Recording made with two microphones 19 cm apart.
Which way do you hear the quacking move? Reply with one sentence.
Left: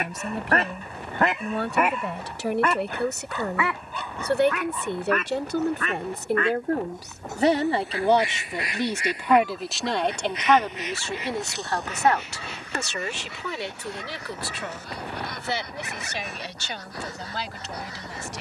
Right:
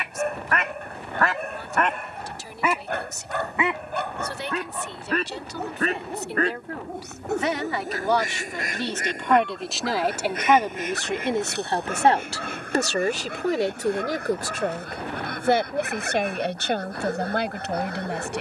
You can hear the quacking move to the right.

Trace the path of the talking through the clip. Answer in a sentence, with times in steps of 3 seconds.
You can hear the talking on the left from 0 s, in the centre from 9 s and on the right from 12 s.